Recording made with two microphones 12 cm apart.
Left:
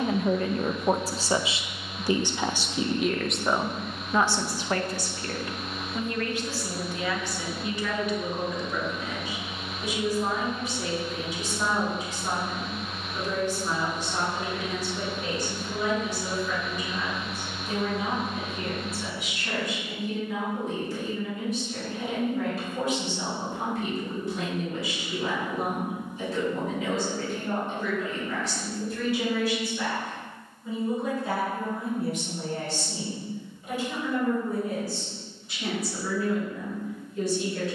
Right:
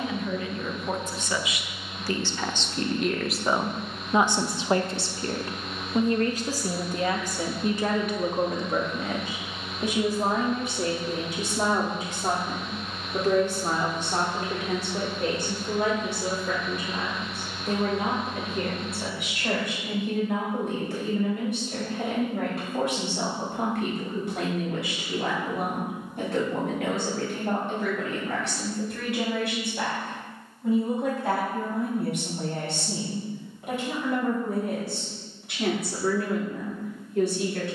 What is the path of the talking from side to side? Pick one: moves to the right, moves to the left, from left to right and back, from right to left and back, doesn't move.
moves to the right.